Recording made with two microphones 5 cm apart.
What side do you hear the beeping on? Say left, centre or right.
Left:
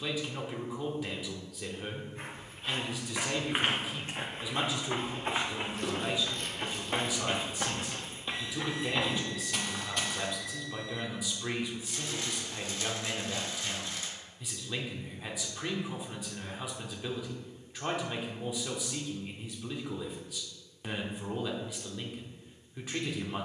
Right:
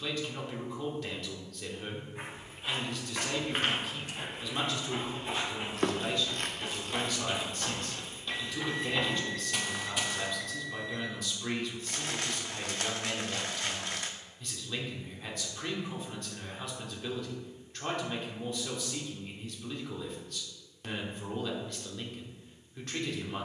right.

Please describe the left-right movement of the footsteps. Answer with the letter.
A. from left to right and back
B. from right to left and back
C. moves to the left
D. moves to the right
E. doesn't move
B.